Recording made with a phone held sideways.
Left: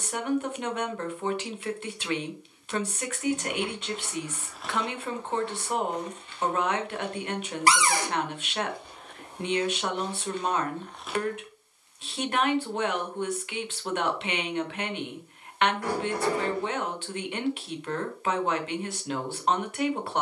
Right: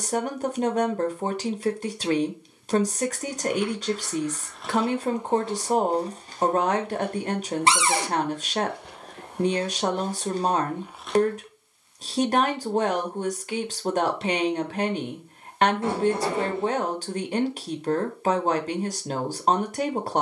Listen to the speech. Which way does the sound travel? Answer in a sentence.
You can hear the speech stay in one place.